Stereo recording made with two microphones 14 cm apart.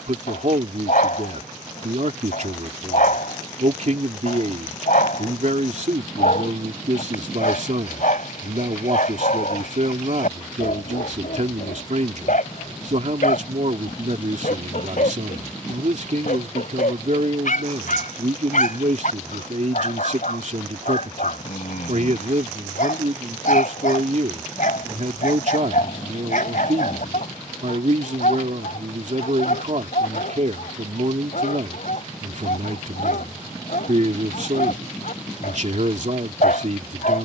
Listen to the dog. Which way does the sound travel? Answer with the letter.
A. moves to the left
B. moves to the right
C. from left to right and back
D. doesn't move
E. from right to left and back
D.